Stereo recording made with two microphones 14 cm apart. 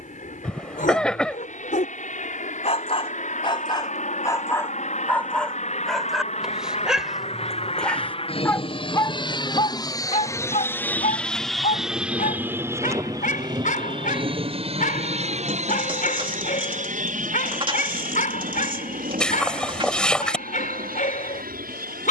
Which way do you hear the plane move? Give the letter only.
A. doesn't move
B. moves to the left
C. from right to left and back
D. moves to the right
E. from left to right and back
D.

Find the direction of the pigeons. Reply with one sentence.
In this clip you hear the pigeons on the right.